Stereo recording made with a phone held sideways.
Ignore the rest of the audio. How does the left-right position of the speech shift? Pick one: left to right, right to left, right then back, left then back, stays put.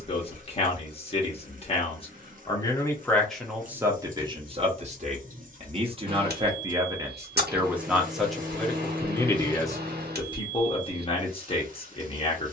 right then back.